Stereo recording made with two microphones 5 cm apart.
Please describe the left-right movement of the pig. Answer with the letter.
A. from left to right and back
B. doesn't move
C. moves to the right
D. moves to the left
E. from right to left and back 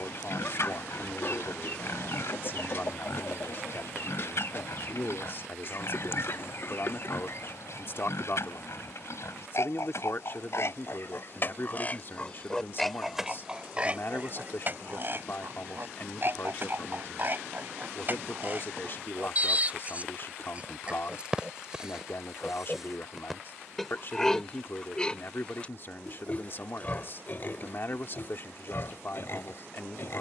A.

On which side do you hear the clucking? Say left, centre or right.
left.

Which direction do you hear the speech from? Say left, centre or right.
left.